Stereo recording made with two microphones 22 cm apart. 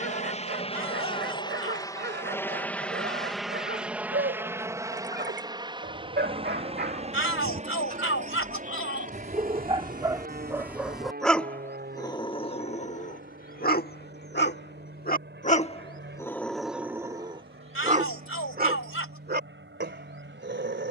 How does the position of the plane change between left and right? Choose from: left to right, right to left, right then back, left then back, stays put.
left to right.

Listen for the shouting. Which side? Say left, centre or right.
left.